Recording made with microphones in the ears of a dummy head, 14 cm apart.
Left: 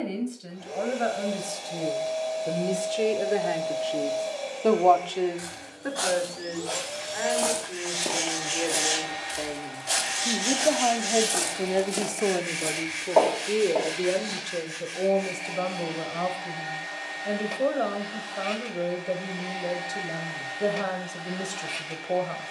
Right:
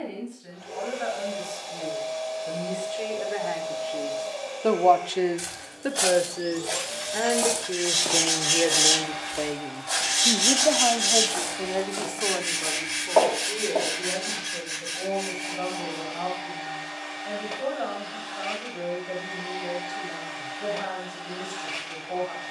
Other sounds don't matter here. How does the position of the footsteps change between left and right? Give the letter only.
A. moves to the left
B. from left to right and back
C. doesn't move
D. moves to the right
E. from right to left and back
E.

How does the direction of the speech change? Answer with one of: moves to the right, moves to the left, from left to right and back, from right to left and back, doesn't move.
from left to right and back.